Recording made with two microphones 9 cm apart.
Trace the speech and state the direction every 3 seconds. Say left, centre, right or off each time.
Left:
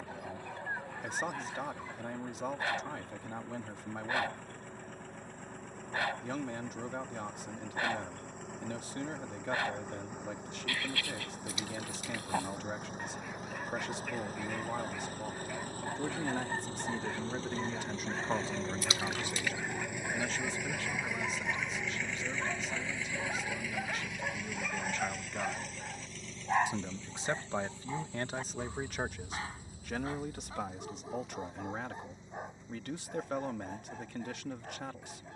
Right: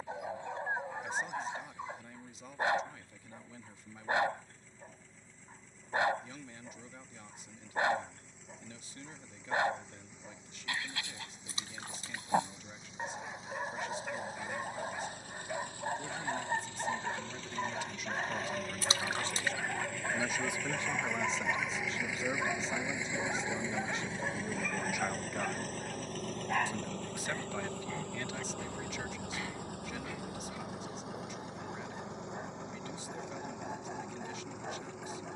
left, left, left, left, left, left, centre, right, centre, left, left, left.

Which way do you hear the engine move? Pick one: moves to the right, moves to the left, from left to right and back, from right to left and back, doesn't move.
moves to the right.